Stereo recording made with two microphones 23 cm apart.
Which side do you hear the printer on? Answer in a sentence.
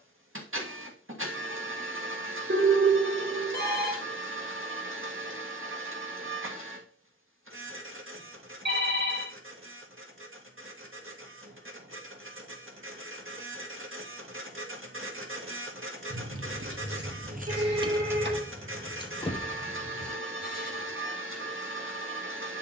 You can hear the printer on the right.